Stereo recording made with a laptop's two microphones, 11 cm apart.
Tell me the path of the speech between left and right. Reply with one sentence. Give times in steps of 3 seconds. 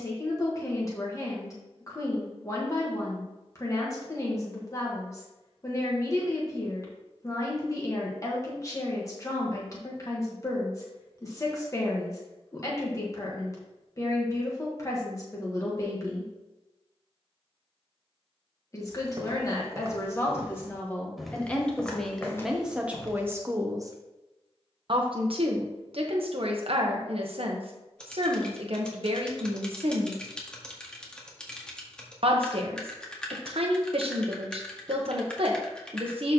You can hear the speech on the left from 0 s, in the centre from 21 s and on the right from 24 s.